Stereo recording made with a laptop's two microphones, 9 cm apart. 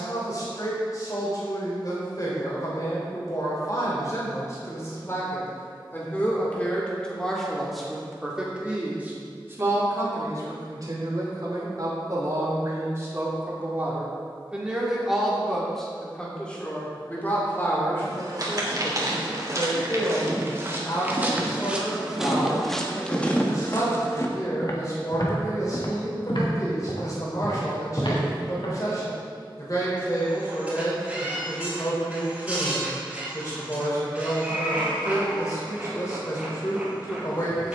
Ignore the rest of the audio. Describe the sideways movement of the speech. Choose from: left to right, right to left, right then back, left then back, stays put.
right then back.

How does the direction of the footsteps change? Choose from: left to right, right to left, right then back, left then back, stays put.
right to left.